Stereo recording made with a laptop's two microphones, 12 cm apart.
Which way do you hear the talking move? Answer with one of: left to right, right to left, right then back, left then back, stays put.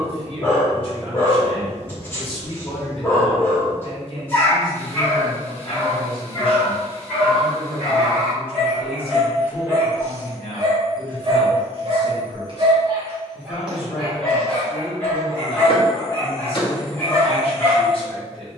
stays put.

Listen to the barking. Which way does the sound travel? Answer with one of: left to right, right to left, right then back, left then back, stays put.
right then back.